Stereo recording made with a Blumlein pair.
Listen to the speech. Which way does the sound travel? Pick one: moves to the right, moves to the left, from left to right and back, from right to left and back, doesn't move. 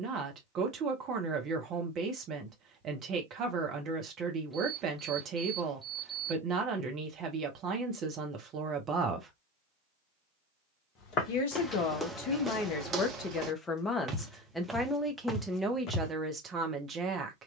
from right to left and back.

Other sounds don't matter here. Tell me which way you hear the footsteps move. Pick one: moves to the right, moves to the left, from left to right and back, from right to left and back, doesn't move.
from left to right and back.